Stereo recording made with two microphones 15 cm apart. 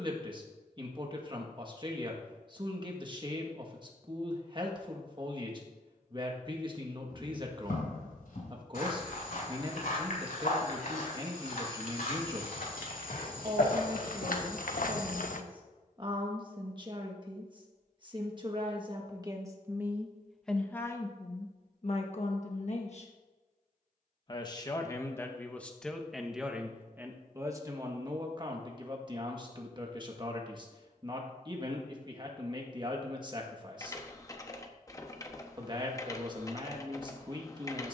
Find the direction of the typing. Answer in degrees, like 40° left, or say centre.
20° left.